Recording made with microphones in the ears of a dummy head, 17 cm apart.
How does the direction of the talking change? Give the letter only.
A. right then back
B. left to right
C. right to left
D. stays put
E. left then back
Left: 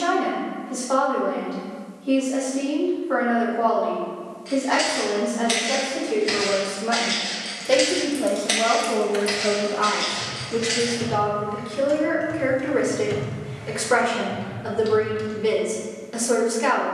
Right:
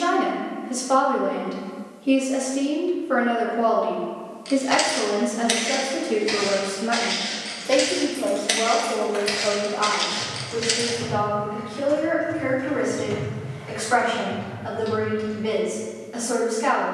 C.